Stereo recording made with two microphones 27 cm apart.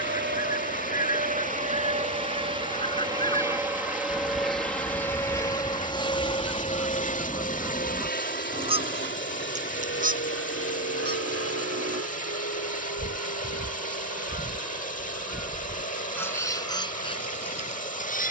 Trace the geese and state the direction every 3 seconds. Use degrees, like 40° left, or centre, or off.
20° left, 10° left, 10° right, 30° right, 30° right, 10° left.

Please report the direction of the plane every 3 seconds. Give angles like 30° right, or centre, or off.
30° right, centre, 30° left, 40° left, 50° left, 60° left.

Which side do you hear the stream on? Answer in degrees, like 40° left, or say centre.
30° left.